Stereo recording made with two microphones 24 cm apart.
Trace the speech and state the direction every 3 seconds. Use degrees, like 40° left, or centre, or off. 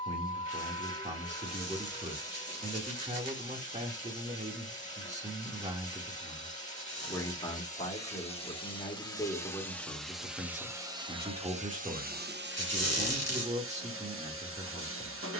30° right, 30° right, 20° left, centre, 30° right.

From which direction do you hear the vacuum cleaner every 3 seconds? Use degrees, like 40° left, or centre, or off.
30° left, 30° left, 30° left, 10° right, 50° right.